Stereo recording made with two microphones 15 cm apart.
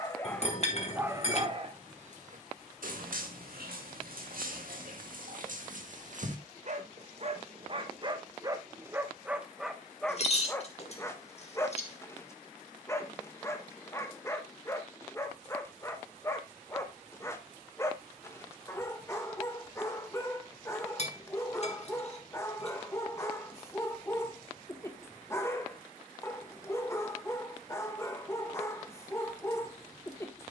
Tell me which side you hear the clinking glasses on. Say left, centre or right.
left.